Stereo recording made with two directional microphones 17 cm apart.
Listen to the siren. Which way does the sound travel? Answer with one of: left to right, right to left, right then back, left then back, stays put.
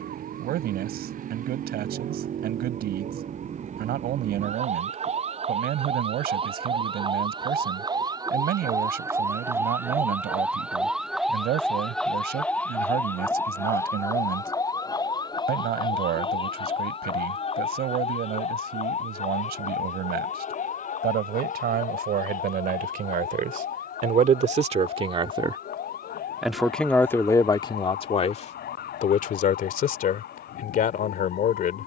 right to left.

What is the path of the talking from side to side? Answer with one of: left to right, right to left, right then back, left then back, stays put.
right to left.